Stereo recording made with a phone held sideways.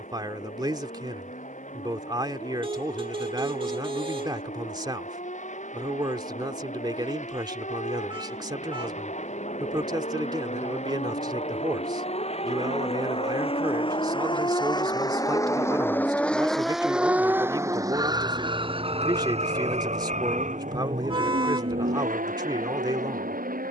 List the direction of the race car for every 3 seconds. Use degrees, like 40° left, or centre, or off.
70° left, 70° left, 70° left, 60° left, 50° left, centre, 50° right, 70° right.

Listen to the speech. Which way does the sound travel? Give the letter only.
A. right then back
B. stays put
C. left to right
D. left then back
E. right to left
B.